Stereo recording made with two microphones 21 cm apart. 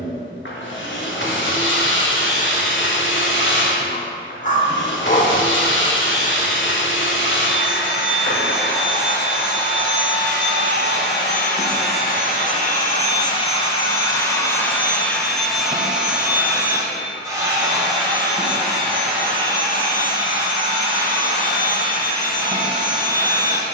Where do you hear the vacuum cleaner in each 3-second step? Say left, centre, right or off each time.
left, left, left, left, left, centre, right, right.